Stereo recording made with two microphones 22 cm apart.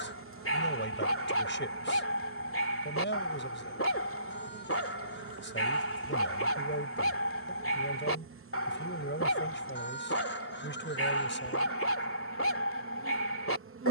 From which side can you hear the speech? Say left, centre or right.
left.